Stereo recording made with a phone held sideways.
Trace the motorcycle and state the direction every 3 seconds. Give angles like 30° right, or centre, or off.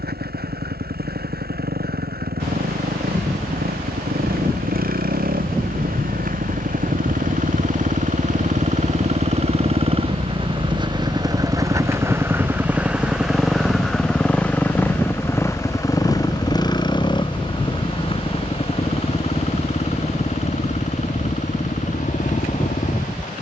80° right, 70° right, 50° right, 30° right, centre, 20° left, 40° left, 50° left.